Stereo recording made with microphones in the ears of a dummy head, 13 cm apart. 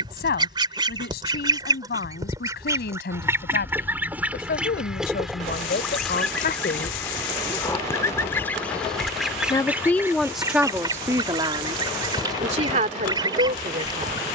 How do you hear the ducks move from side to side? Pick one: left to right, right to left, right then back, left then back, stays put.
left then back.